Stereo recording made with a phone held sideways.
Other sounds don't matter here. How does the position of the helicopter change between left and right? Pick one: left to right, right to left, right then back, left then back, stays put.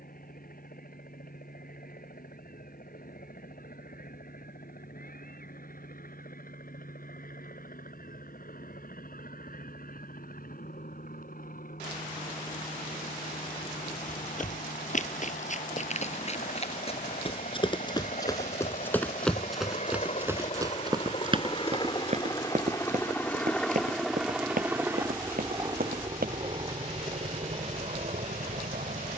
left to right.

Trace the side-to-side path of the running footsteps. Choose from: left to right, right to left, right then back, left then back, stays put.
left to right.